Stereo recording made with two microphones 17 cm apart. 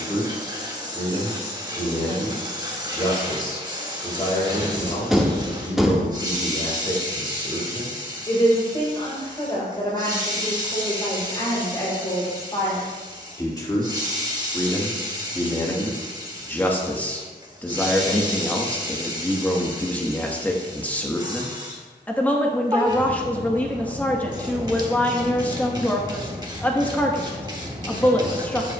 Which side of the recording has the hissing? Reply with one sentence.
You can hear the hissing on the right.